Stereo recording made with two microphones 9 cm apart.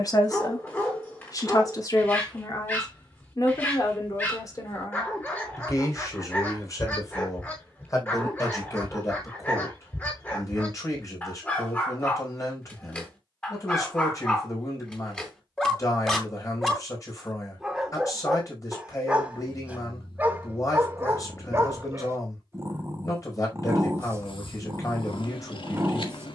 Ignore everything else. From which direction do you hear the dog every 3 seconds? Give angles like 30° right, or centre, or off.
20° left, 20° left, 20° left, 20° left, 20° left, centre, 10° right, 30° right, 30° right.